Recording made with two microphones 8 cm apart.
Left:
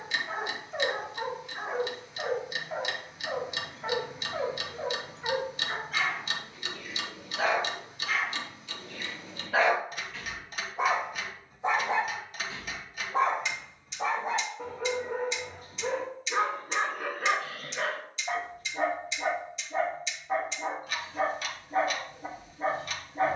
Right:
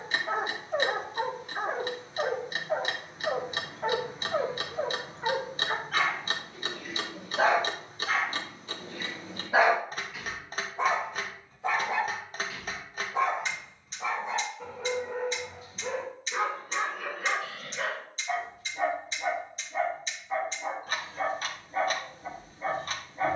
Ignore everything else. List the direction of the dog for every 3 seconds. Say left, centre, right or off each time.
right, right, right, centre, left, left, left, left.